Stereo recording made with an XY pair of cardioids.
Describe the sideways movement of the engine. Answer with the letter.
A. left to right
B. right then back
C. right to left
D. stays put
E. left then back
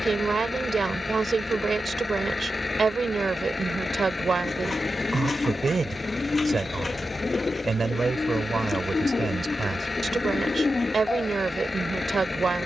D.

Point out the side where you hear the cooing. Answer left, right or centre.
left.